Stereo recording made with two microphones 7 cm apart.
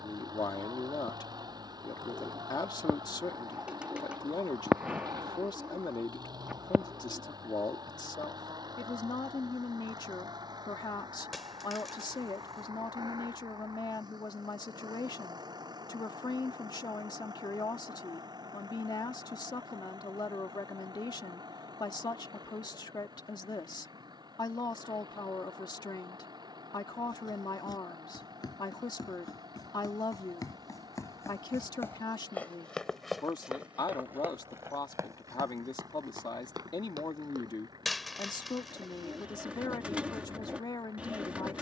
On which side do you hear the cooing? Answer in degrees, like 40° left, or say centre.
20° right.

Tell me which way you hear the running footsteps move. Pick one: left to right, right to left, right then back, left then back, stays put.
left to right.